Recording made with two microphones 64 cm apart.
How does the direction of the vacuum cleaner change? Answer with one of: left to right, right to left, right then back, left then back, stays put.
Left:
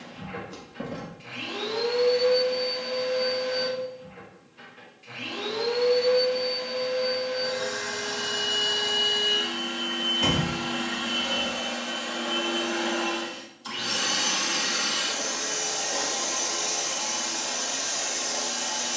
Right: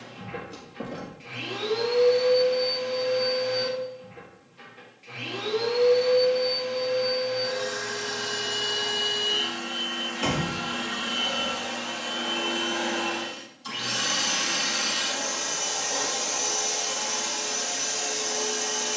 left to right.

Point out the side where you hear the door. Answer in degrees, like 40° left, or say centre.
30° left.